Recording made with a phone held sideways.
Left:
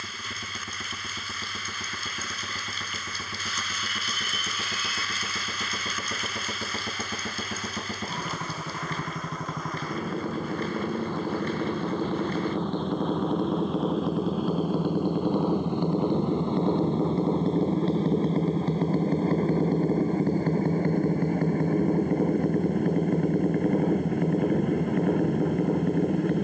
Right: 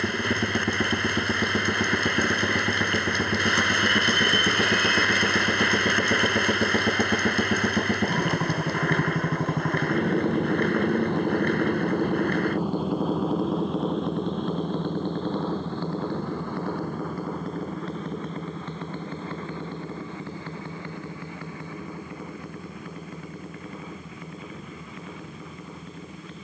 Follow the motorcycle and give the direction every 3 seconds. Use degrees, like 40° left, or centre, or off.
60° right, 50° right, 40° right, 30° right, centre, 20° left, 40° left, 50° left, 60° left.